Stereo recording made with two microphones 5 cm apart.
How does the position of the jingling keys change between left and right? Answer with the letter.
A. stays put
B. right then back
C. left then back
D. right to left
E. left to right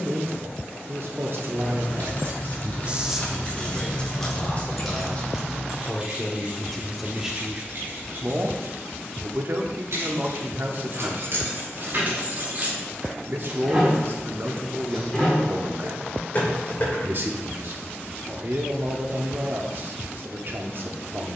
B.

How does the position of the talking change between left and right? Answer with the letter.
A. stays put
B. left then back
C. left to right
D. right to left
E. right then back
B.